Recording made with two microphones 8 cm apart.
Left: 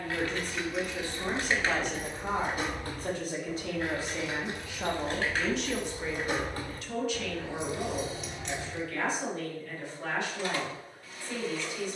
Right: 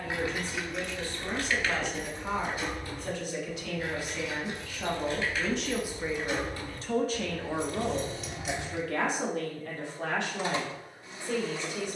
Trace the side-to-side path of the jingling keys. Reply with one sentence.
In this clip you hear the jingling keys go left and come back.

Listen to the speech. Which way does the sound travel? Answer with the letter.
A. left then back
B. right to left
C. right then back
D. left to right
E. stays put
D.